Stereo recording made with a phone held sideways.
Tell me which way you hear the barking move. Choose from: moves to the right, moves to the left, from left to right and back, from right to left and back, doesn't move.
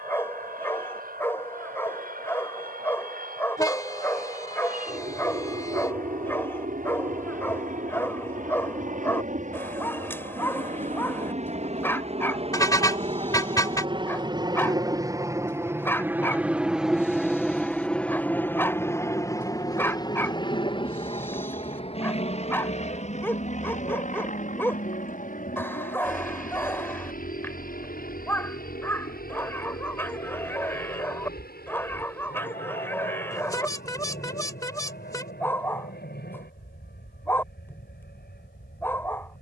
doesn't move.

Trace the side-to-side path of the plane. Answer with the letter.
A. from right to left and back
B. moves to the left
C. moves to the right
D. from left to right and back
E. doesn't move
B.